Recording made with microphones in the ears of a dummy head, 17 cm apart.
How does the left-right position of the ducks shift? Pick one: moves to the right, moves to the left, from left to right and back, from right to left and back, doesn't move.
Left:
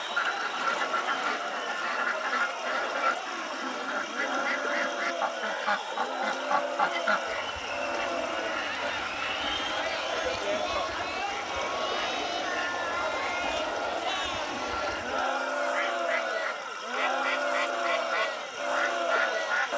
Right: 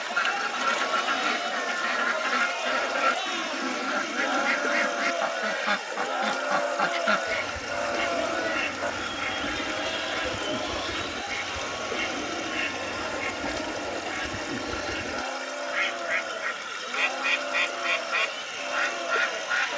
doesn't move.